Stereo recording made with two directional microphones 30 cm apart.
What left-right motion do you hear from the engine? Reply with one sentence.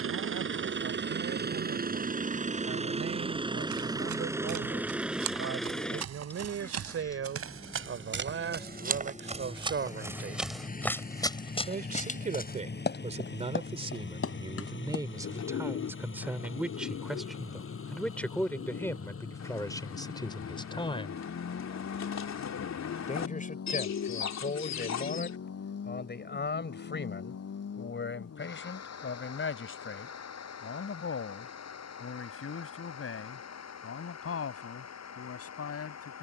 You can hear the engine move from right to left.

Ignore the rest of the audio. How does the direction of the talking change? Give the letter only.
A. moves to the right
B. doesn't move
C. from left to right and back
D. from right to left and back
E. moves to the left
E.